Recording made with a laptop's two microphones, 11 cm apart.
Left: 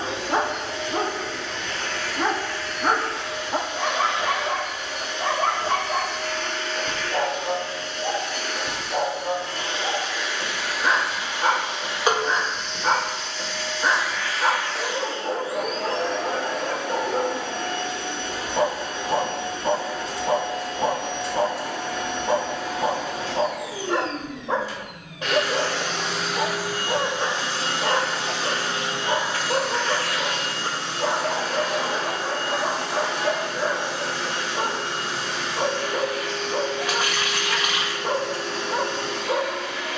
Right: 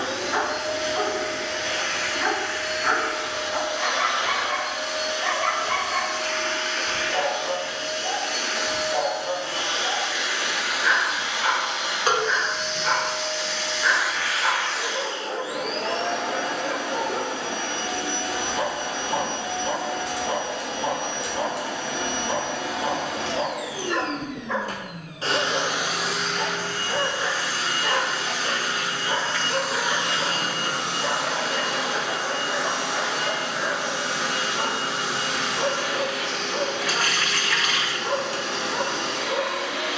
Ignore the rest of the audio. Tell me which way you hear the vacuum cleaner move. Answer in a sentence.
You can hear the vacuum cleaner go left and come back.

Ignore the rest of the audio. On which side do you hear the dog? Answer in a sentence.
In this clip you hear the dog on the left.